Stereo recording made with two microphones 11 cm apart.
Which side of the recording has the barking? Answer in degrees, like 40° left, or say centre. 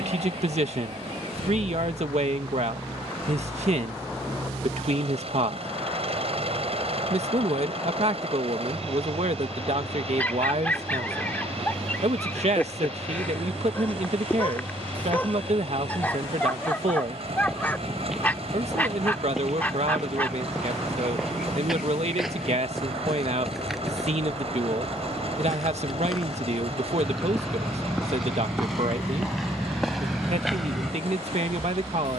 20° left.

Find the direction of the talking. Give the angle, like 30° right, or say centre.
70° right.